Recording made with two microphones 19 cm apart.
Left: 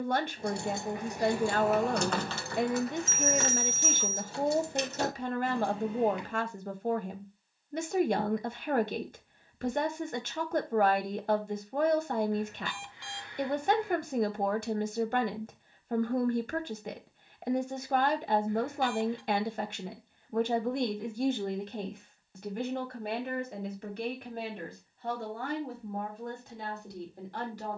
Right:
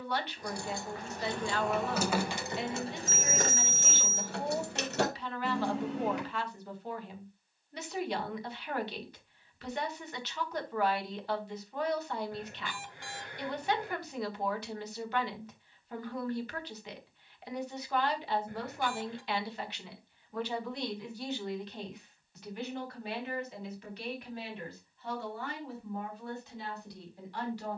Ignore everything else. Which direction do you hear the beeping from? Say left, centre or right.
right.